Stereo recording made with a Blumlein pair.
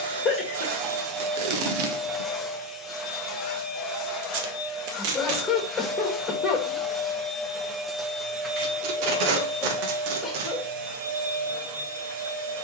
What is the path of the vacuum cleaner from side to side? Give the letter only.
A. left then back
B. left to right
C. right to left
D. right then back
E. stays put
A.